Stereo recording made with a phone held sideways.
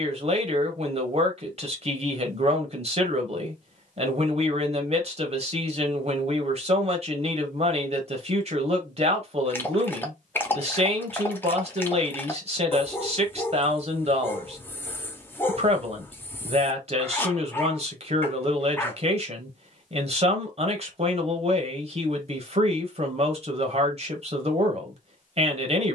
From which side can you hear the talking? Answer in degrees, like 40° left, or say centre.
50° right.